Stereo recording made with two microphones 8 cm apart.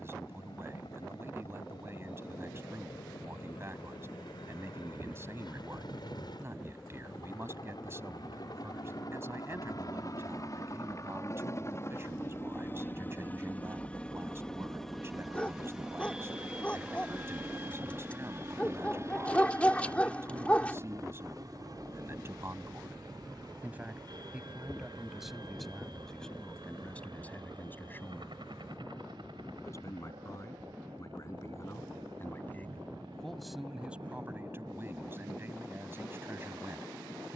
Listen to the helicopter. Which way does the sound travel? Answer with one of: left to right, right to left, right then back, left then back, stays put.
left to right.